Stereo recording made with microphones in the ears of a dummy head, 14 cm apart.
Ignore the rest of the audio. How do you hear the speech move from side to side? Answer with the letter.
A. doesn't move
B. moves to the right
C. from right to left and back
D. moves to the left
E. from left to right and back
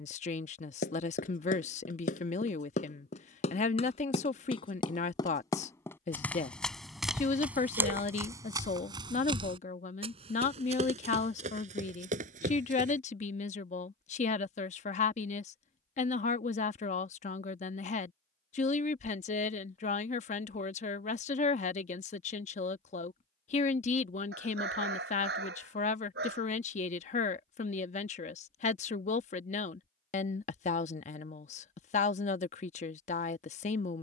A.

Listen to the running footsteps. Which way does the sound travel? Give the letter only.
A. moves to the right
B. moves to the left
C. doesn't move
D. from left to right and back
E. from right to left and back
A.